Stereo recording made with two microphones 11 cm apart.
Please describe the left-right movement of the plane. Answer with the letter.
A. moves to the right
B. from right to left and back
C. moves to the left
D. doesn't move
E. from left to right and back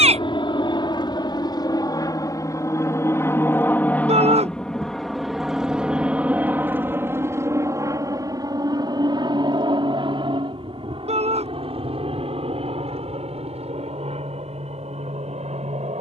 A.